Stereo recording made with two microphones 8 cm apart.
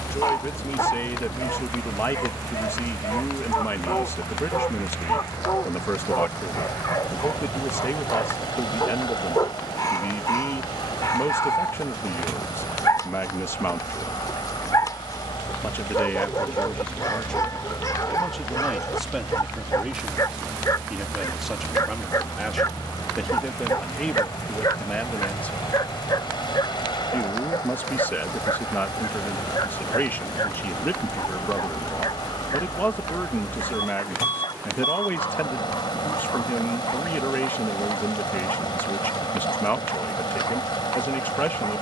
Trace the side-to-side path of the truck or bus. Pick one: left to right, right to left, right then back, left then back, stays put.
stays put.